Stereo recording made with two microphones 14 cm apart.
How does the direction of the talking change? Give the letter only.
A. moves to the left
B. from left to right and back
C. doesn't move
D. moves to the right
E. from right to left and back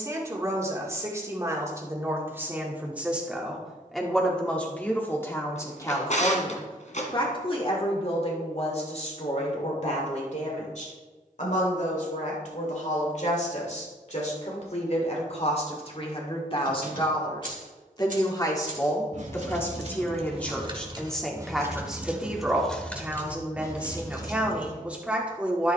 E.